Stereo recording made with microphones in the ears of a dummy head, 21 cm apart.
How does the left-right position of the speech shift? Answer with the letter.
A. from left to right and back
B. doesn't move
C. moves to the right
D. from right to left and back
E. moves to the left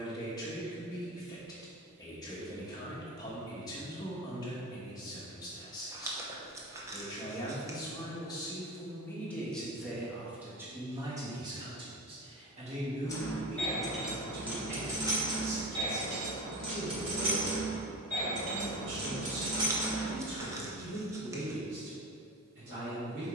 C.